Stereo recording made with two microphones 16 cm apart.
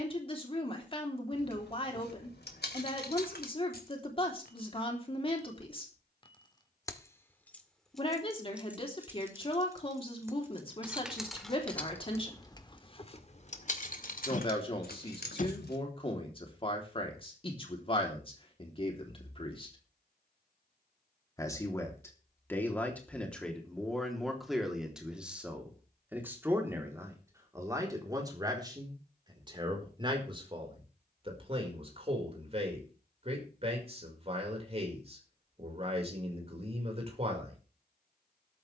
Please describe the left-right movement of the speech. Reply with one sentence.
You can hear the speech go from the left side to the right.